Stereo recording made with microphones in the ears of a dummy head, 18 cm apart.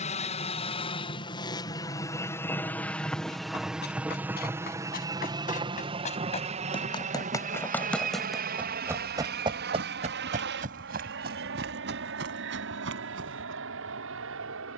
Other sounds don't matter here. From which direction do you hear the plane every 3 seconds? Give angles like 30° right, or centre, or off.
20° left, 10° right, 40° right, 50° right, 60° right.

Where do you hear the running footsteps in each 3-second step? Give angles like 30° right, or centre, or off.
off, 50° left, 10° left, 40° right, 60° right.